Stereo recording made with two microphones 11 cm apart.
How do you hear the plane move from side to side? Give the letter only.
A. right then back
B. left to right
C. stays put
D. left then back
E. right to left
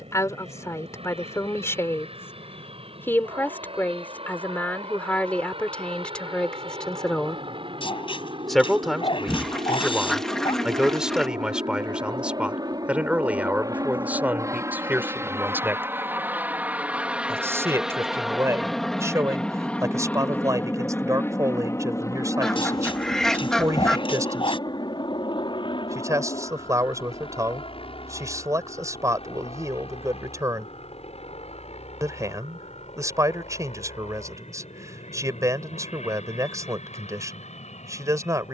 E.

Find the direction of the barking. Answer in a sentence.
You can hear the barking on the left.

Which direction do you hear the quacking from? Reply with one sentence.
You can hear the quacking in the centre.